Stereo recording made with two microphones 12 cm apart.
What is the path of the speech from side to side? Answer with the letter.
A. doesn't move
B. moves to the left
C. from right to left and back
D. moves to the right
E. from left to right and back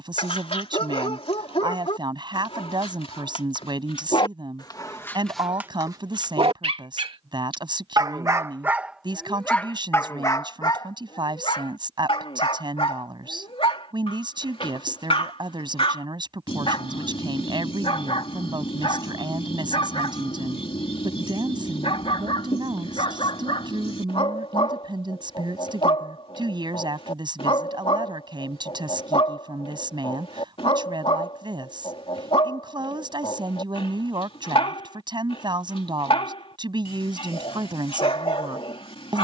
A.